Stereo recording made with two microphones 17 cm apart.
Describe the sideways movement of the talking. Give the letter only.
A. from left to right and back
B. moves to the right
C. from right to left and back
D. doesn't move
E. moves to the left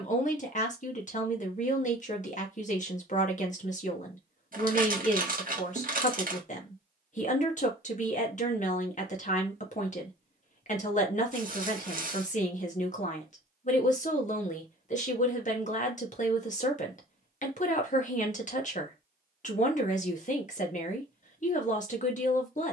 D.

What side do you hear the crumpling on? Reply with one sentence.
In this clip you hear the crumpling on the right.